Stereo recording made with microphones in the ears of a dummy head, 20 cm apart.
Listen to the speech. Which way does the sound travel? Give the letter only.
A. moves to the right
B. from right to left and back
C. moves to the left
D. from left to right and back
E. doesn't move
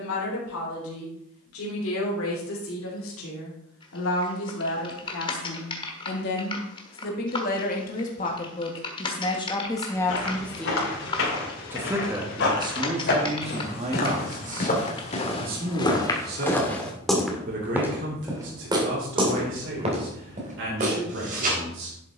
A.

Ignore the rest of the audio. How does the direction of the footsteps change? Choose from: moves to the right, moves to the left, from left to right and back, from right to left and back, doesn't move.
moves to the right.